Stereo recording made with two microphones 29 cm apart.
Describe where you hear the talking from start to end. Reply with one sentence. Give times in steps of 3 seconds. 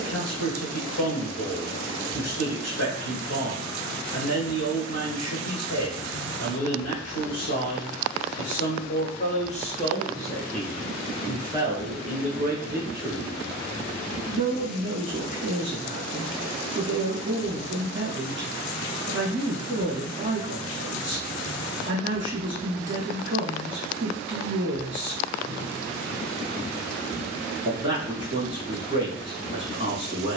You can hear the talking on the left from 0 s, in the centre from 9 s and on the right from 12 s.